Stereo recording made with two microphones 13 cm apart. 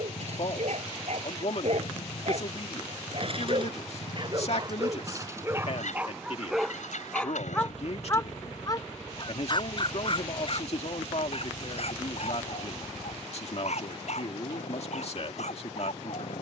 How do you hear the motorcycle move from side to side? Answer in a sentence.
In this clip you hear the motorcycle stay in one place.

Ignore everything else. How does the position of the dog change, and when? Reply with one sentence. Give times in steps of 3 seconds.
You can hear the dog on the right from 0 s, in the centre from 6 s and on the left from 9 s.